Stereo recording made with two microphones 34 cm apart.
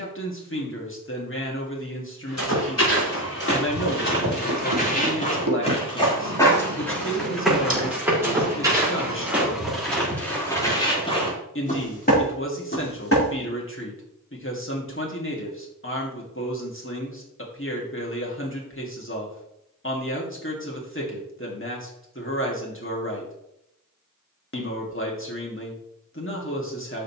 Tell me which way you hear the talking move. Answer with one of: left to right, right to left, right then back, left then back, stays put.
stays put.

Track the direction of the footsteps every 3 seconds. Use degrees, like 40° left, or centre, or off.
50° left, 30° left, centre, 10° left, 30° left, off, off, off, off.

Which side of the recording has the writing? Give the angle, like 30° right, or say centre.
80° right.